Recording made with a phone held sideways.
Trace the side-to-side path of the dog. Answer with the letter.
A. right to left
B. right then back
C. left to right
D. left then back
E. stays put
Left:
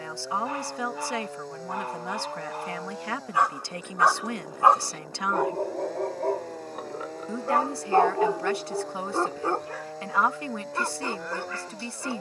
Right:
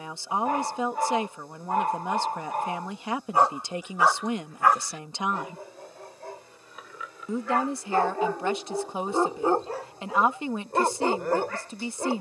D.